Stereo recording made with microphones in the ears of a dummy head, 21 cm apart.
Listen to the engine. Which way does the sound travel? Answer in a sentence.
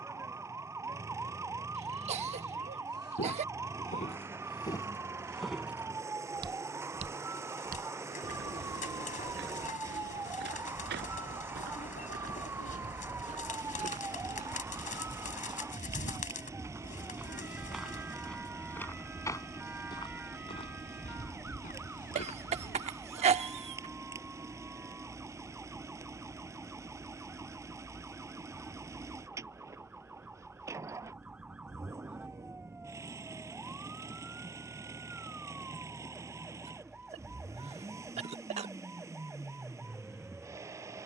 You can hear the engine stay in one place.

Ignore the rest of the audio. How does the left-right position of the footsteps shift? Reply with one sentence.
In this clip you hear the footsteps go right and come back.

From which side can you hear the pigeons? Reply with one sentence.
You can hear the pigeons on the left.